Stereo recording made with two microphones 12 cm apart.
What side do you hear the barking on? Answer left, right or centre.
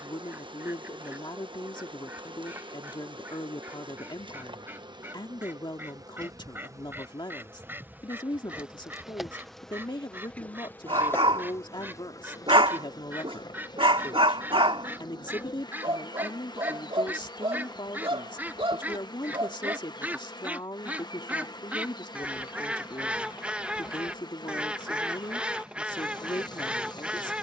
right.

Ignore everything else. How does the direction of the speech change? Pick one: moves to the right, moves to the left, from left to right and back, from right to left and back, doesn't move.
doesn't move.